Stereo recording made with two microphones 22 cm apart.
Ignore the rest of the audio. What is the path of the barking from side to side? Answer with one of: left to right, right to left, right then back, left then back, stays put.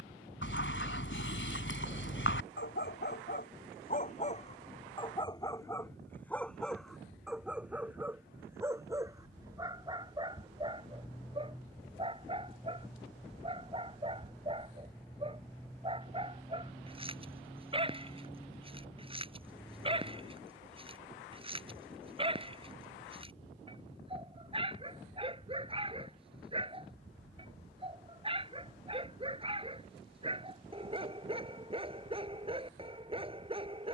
left to right.